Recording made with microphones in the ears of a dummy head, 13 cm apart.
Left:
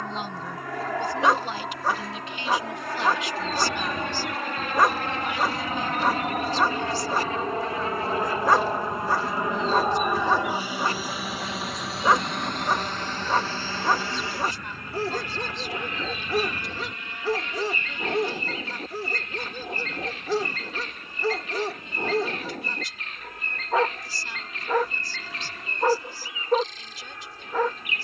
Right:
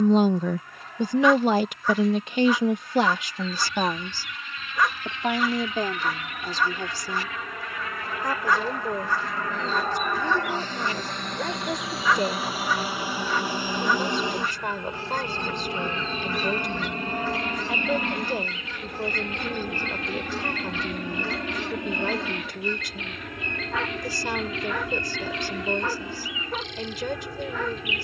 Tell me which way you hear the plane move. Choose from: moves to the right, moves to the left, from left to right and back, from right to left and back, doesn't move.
moves to the right.